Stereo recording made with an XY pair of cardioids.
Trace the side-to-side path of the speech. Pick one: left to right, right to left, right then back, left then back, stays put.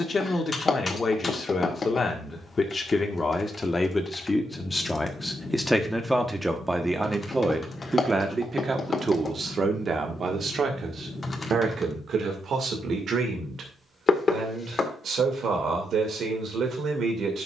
left to right.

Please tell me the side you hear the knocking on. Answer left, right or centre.
left.